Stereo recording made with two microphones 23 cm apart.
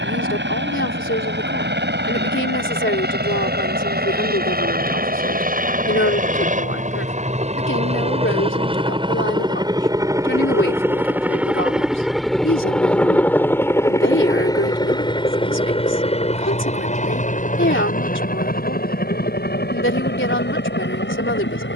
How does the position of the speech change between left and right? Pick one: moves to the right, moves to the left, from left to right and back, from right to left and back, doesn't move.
doesn't move.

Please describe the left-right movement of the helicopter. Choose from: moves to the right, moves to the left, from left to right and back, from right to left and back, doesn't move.
moves to the left.